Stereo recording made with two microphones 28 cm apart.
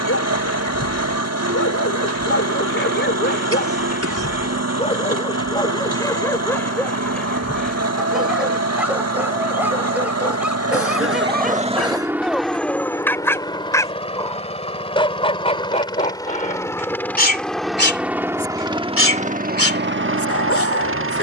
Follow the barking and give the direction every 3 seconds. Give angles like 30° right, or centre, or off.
50° left, 30° left, centre, centre, 10° left, 30° left, 50° left.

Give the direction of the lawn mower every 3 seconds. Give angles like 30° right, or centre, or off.
60° right, 60° right, 60° right, 50° right, 10° left, 10° left, 30° right.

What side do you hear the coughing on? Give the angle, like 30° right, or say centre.
60° right.